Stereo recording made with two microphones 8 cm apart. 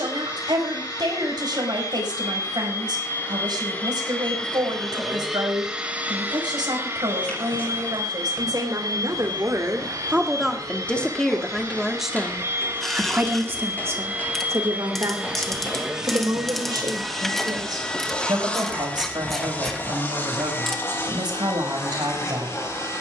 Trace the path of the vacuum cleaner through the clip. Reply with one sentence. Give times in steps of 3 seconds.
In this clip you hear the vacuum cleaner on the left from 0 s, in the centre from 3 s, on the right from 6 s, in the centre from 15 s and on the left from 18 s.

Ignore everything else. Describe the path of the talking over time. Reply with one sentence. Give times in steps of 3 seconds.
In this clip you hear the talking on the right from 0 s, in the centre from 9 s and on the right from 12 s.